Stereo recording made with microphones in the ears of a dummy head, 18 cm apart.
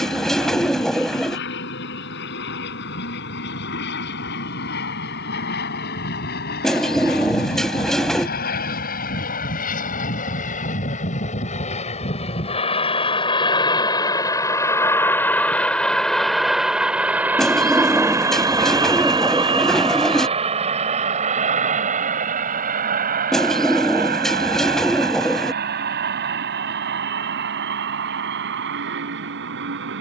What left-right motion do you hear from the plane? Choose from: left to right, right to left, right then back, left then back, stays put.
left to right.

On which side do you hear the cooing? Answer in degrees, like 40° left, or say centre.
centre.